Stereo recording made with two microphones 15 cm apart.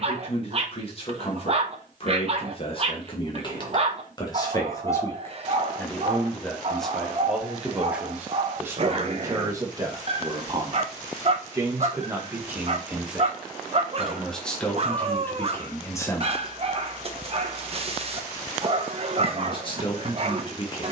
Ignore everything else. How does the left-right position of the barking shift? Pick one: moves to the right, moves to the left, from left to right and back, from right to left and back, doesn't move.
doesn't move.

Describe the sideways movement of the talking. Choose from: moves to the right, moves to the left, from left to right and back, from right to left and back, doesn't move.
from left to right and back.